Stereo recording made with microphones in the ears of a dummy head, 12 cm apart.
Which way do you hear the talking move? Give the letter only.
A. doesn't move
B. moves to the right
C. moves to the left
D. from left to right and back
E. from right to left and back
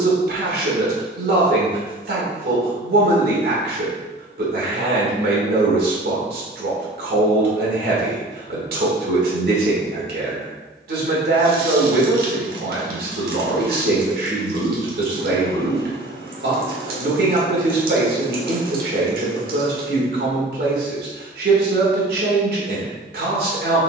A.